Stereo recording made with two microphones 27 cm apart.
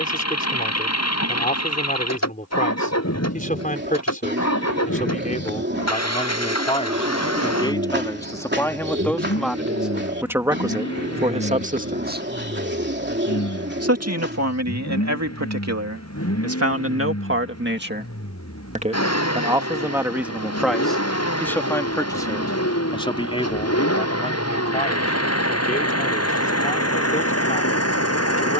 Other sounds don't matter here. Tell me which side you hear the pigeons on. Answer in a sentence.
In this clip you hear the pigeons on the right.